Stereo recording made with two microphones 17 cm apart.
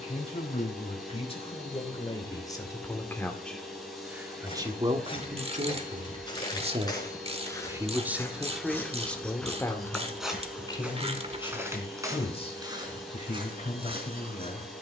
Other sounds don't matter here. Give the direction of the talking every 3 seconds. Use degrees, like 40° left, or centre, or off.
30° left, 20° right, 20° right, 20° left, 40° left.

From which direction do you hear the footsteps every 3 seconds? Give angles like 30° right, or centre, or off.
off, 30° left, 20° left, 10° right, 30° right.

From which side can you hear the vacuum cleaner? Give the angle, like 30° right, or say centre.
centre.